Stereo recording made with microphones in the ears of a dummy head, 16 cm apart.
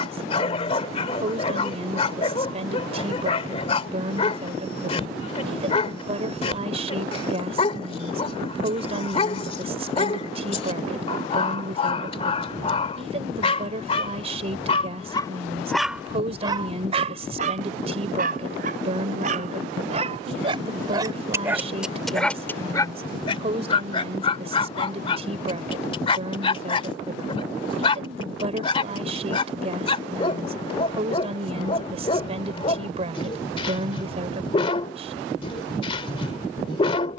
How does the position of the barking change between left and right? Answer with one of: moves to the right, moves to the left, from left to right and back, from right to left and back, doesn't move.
from left to right and back.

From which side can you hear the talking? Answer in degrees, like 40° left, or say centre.
40° right.